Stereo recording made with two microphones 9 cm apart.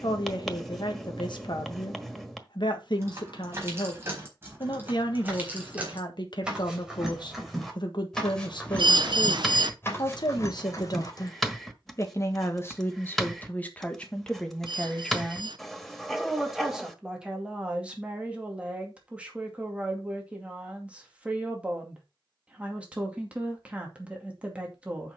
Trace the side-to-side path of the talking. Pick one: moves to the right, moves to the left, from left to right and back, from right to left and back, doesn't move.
moves to the right.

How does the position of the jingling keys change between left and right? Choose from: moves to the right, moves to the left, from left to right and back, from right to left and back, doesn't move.
moves to the left.